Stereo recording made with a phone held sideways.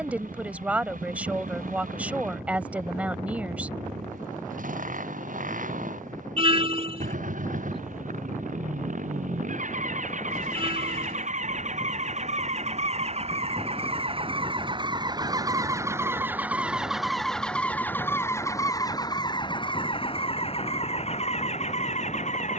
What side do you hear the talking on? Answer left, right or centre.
centre.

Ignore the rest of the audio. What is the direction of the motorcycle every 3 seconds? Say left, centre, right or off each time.
right, right, right, right, right, centre, left, left.